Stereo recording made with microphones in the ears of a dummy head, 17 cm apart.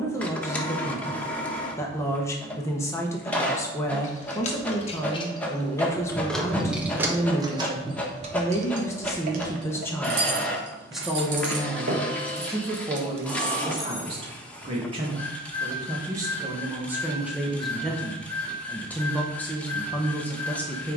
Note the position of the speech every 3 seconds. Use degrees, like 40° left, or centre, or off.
10° left, 10° left, 10° left, centre, 20° right, 10° right, 10° left.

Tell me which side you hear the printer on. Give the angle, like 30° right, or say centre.
10° left.